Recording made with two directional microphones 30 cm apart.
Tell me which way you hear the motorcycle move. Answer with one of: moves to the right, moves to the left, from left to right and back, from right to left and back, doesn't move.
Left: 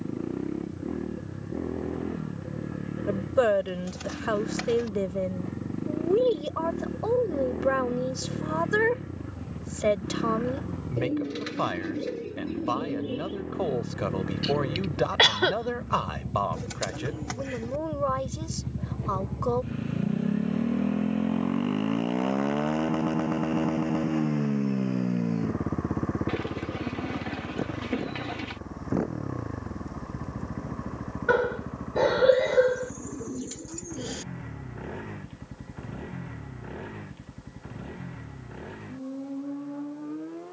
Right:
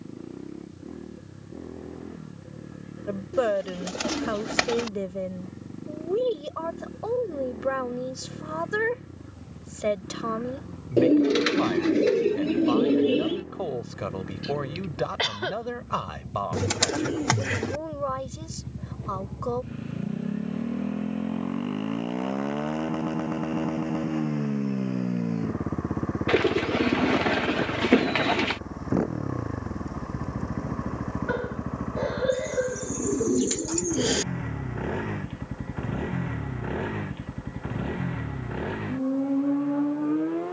moves to the right.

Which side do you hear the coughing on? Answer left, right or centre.
left.